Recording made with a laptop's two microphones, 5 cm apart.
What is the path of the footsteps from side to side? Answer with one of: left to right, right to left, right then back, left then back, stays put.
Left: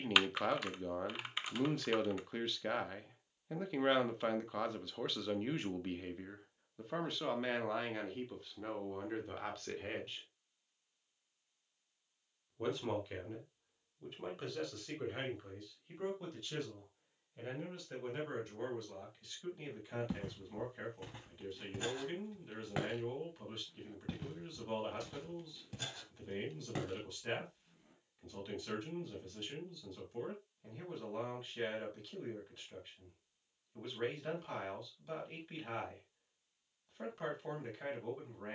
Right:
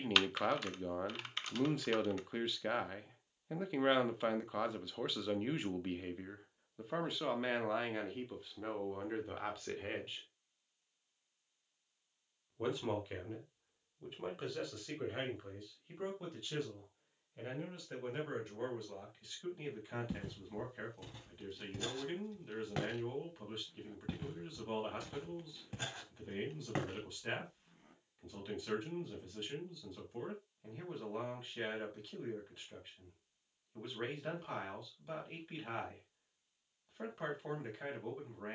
left to right.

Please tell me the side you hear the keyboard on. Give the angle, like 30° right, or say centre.
10° left.